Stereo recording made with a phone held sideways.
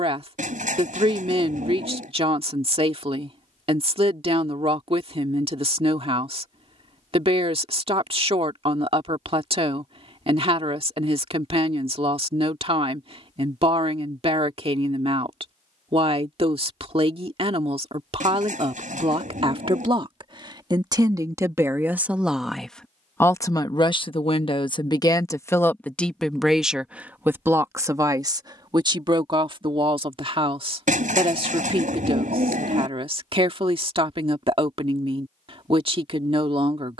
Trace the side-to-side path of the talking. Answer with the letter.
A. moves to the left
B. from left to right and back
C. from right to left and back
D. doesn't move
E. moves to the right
C.